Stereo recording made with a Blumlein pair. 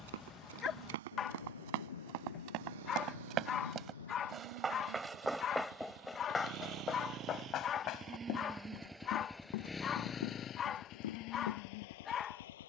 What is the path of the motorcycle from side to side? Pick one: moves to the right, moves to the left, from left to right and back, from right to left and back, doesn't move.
moves to the left.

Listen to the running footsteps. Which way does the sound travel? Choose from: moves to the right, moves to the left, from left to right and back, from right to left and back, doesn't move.
moves to the left.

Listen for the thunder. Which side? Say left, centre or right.
left.